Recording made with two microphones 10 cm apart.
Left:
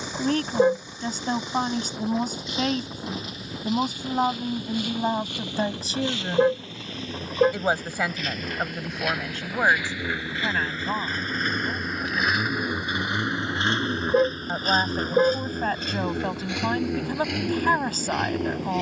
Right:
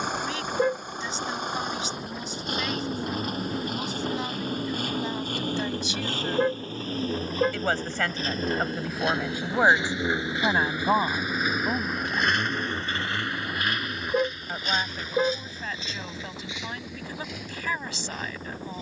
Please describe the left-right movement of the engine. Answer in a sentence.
In this clip you hear the engine go from the right side to the left.